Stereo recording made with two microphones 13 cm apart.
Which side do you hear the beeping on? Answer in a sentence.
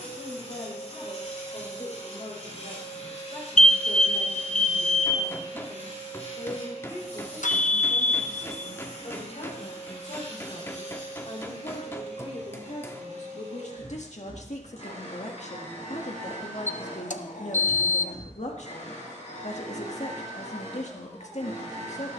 In this clip you hear the beeping on the left.